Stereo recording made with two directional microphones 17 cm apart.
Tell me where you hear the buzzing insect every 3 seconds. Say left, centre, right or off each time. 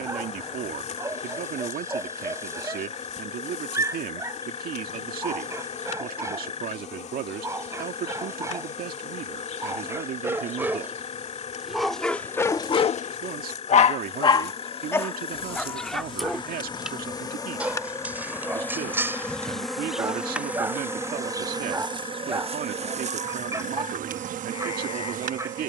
left, left, left, left, left, left, centre, right, right.